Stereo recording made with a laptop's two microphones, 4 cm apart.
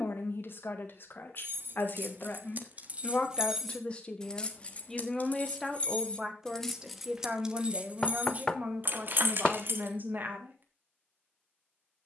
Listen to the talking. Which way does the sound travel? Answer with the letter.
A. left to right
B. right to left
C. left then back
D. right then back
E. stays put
A.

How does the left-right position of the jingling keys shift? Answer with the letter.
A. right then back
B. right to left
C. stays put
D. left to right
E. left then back
E.